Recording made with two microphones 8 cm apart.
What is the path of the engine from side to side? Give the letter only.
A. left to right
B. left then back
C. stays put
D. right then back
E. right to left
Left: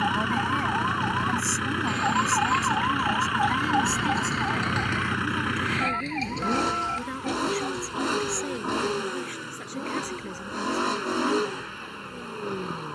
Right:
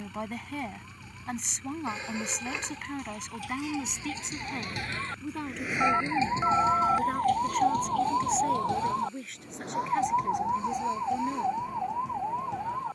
C.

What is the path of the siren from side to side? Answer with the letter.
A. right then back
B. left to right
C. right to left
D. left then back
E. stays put
B.